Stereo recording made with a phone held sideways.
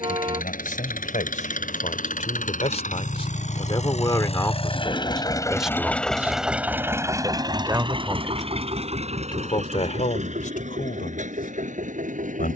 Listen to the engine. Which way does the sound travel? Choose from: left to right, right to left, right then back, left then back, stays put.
left to right.